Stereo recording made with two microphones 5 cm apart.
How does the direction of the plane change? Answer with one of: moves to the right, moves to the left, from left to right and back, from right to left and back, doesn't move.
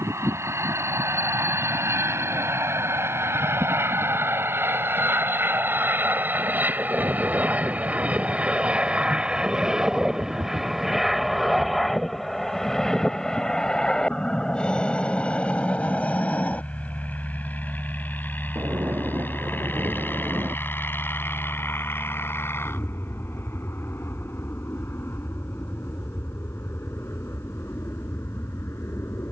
moves to the left.